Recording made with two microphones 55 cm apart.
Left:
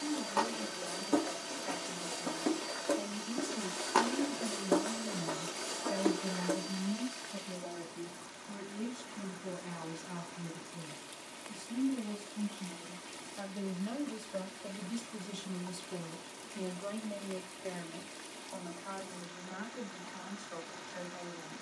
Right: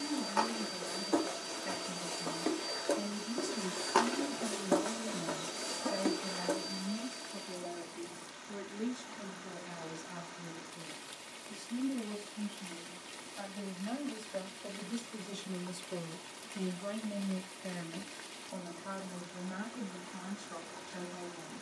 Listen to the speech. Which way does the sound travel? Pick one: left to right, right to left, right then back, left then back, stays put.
left then back.